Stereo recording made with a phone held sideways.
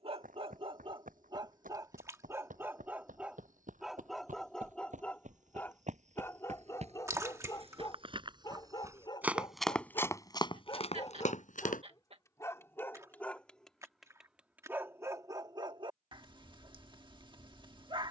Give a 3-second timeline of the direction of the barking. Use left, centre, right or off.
right, centre, left, left, centre, right.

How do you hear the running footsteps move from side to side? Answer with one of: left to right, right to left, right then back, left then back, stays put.
right to left.